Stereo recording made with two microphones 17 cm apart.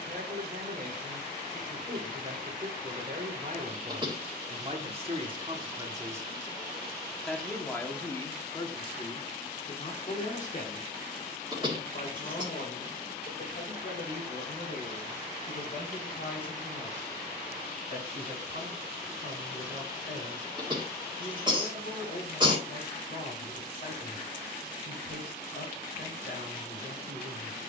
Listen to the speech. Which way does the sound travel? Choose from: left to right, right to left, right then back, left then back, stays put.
right to left.